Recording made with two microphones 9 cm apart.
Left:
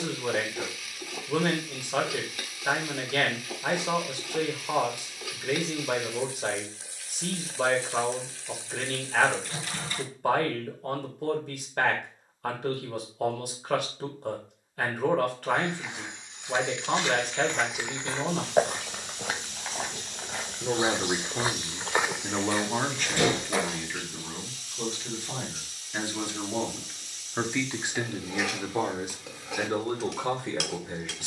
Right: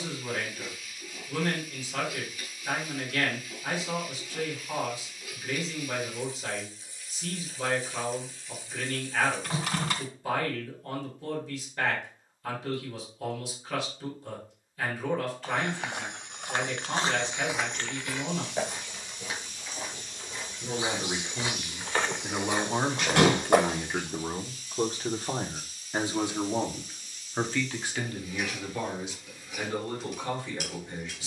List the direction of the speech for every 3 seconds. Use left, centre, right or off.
left, left, left, left, left, left, left, centre, right, left, left.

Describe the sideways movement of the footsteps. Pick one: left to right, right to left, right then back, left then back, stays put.
left then back.